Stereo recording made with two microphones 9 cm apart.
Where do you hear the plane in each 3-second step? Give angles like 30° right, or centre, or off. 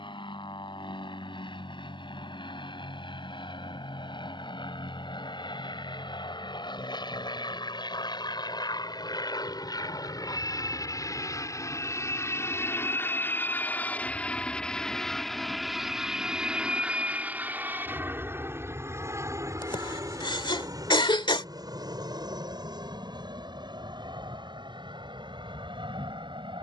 70° left, 70° left, 60° left, 40° left, 20° left, 10° right, 30° right, 50° right, 60° right.